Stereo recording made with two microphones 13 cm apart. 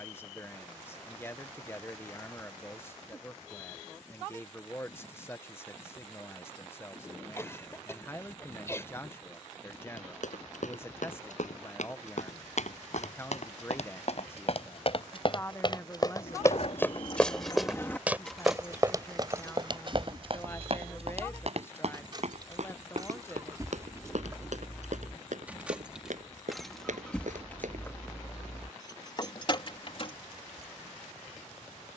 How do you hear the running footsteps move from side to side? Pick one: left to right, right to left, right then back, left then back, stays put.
left to right.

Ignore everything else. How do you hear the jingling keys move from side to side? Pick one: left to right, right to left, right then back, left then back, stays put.
right then back.